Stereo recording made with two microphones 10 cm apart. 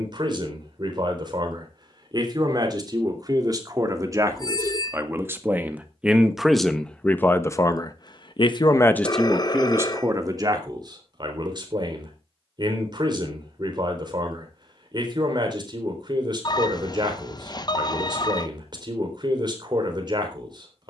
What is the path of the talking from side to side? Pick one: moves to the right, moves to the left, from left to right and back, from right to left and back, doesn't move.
from right to left and back.